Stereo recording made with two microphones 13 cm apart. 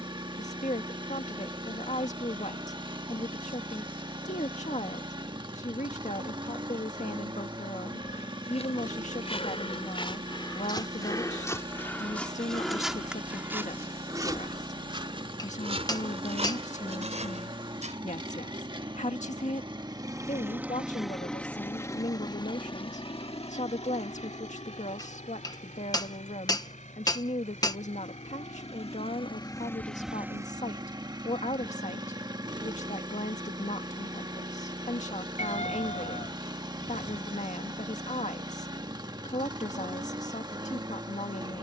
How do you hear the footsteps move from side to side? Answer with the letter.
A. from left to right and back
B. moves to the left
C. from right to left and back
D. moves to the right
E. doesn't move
D.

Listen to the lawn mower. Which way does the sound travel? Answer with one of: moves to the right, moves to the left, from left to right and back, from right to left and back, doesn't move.
from right to left and back.